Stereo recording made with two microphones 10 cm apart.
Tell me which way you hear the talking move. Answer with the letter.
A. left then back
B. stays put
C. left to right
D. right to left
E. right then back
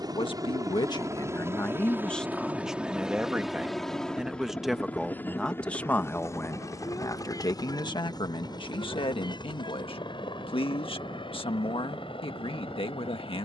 E.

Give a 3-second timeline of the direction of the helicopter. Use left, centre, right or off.
right, centre, left, left, left.